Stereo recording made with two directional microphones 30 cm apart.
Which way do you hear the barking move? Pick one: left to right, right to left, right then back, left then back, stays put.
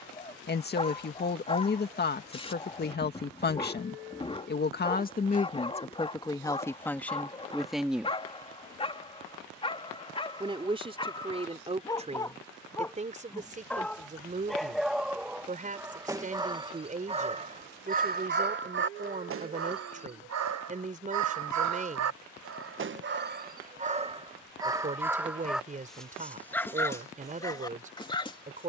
right then back.